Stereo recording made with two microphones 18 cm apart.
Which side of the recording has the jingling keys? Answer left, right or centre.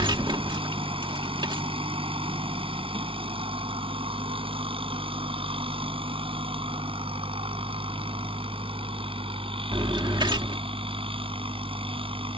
right.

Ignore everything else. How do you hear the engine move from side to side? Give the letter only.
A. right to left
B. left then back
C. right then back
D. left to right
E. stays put
E.